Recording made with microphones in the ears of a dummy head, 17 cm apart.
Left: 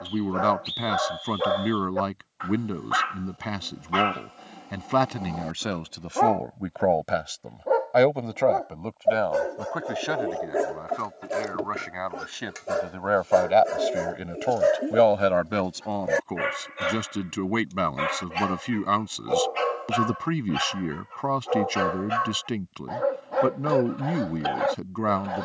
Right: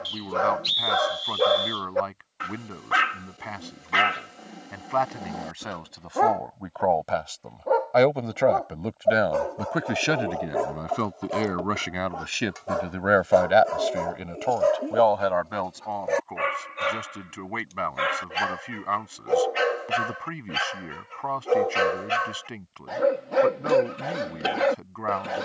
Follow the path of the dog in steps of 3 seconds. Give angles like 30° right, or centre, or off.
40° right, 20° right, centre, 20° left, 20° left, 10° left, 20° right, 30° right, 30° right.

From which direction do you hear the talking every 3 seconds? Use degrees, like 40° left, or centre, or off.
50° left, 50° left, 10° left, 40° right, 10° right, 50° left, 50° left, 50° left, 50° left.